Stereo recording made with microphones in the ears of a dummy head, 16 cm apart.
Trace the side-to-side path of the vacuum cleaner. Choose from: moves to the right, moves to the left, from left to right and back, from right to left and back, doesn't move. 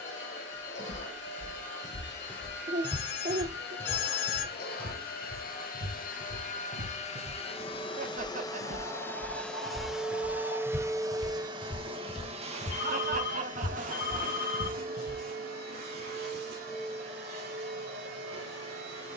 moves to the right.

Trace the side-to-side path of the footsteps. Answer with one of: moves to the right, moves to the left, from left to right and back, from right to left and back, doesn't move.
from left to right and back.